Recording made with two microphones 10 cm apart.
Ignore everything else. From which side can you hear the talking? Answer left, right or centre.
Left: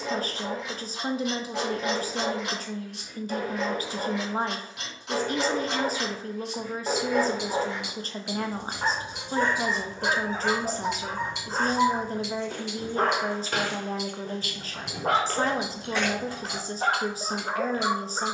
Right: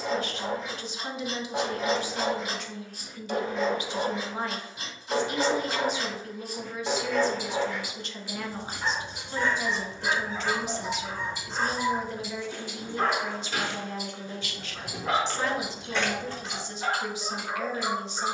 left.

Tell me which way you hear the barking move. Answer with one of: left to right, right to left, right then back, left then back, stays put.
right to left.